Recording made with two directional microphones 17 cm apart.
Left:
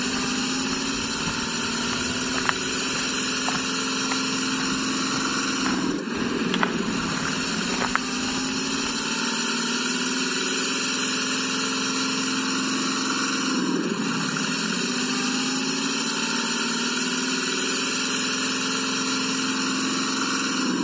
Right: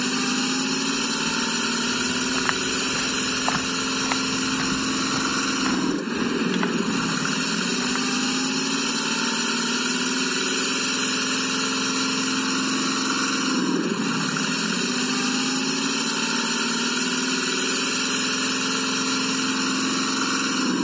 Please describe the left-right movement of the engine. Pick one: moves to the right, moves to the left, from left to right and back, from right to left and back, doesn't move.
doesn't move.